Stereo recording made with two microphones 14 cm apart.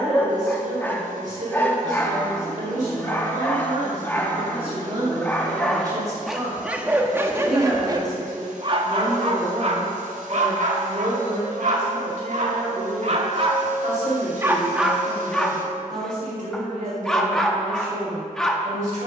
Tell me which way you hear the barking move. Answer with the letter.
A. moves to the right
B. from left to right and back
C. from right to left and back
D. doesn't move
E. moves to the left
B.